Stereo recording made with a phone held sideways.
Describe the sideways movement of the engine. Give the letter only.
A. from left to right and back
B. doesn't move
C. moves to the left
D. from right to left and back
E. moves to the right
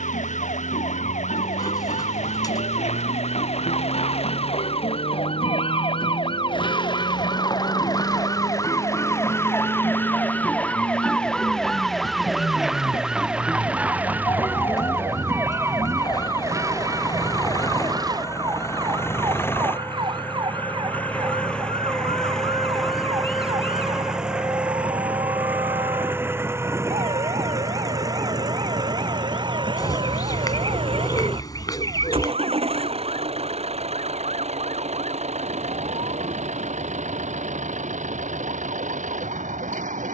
E.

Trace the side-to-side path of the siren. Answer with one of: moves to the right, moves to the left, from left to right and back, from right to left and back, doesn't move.
moves to the right.